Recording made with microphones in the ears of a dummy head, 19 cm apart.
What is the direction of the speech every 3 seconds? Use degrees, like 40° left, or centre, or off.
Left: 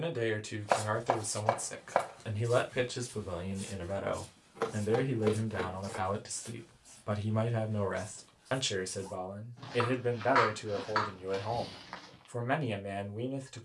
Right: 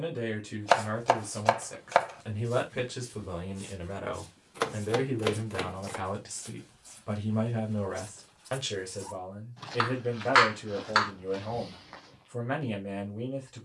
20° left, centre, 10° left, 20° left, 20° left.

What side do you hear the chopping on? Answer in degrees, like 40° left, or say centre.
70° right.